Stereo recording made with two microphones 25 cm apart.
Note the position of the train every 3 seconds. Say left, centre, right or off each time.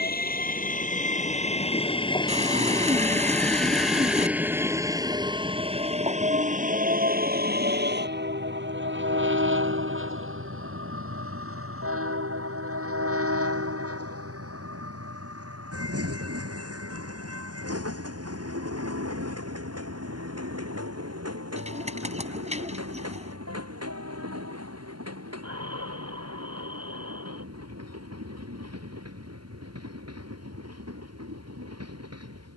left, centre, right, right, right, right, right, right, right, right, right.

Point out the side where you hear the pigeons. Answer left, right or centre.
right.